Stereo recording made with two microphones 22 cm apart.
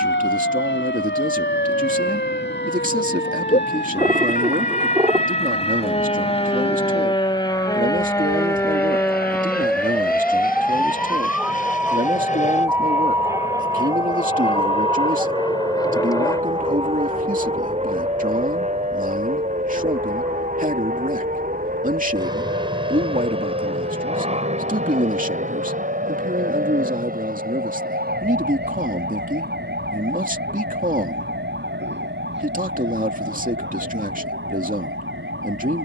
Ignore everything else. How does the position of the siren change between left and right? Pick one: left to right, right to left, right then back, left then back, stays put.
left to right.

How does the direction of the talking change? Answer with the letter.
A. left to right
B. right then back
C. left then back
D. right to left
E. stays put
E.